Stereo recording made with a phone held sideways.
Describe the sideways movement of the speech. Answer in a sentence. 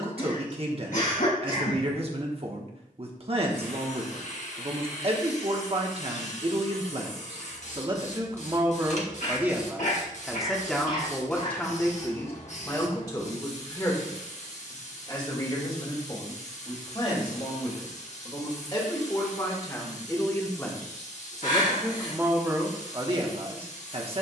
You can hear the speech move from right to left and back again.